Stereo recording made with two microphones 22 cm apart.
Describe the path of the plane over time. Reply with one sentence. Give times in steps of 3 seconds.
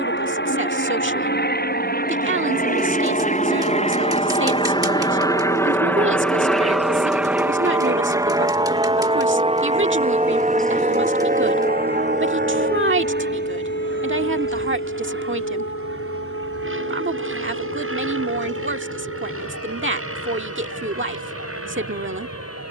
In this clip you hear the plane on the left from 0 s, in the centre from 6 s and on the right from 9 s.